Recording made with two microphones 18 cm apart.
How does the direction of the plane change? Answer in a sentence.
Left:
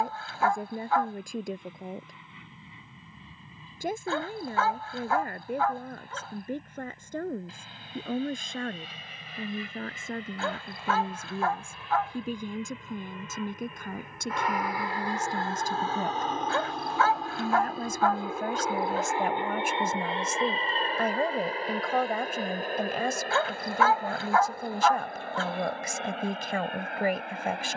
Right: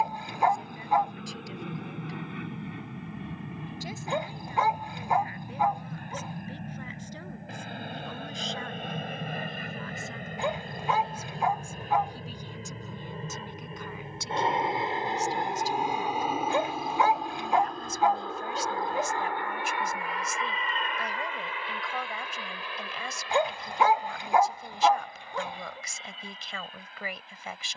In this clip you hear the plane move from right to left.